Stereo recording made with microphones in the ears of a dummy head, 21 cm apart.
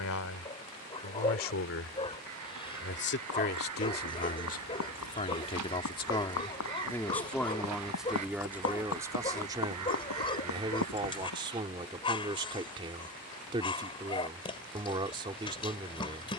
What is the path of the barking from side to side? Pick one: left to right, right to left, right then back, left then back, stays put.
stays put.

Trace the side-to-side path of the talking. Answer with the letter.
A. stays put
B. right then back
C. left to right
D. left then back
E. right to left
C.